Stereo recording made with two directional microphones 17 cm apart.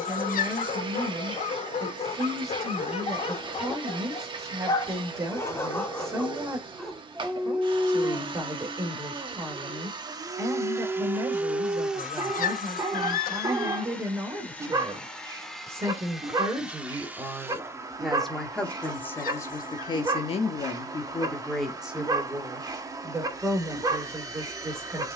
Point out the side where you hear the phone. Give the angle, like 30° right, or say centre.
60° left.